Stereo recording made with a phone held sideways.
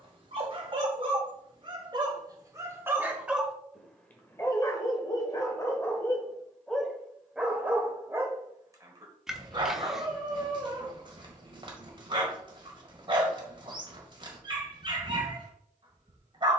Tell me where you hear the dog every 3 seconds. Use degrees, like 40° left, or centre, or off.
30° right, 20° left, 10° right, 30° right, 40° right, 40° right.